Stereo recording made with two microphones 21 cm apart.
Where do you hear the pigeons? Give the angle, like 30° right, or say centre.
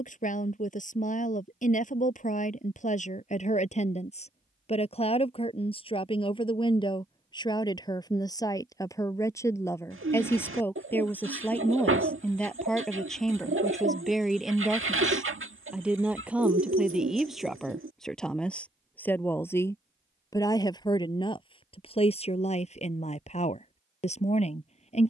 80° right.